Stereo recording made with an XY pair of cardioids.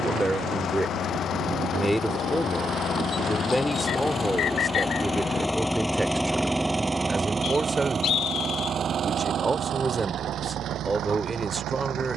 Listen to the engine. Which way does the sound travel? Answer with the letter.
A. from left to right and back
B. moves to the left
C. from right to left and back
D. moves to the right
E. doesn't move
D.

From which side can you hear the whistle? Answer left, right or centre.
left.